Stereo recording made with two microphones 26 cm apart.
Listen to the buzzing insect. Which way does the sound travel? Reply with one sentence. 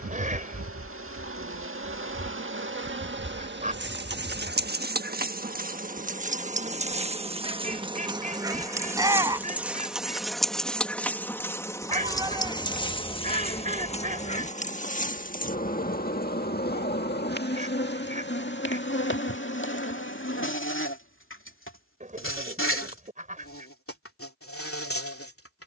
In this clip you hear the buzzing insect go from the right side to the left.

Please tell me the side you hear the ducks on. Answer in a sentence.
You can hear the ducks on the right.